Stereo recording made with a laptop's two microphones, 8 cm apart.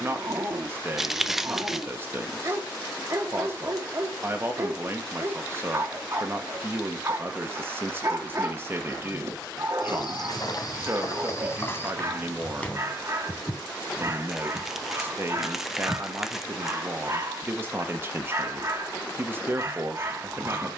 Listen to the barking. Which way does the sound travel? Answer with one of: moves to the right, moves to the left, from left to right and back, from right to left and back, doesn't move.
doesn't move.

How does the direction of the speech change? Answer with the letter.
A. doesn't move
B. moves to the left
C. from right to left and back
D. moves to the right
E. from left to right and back
A.